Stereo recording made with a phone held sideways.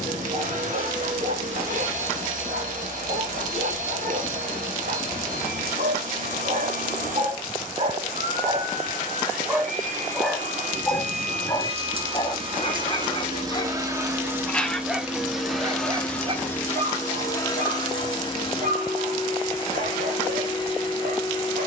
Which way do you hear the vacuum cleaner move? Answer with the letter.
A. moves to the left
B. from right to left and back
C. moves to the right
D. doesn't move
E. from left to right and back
A.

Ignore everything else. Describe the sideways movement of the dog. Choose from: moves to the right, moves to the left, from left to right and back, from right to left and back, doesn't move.
from right to left and back.